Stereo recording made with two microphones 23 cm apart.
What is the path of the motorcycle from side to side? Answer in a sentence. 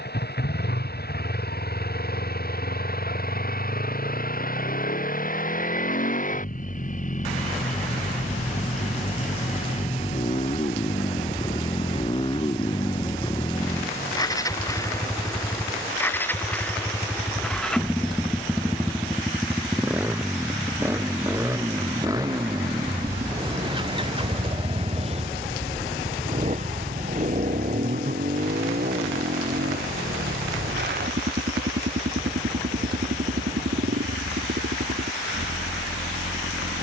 You can hear the motorcycle move to the right.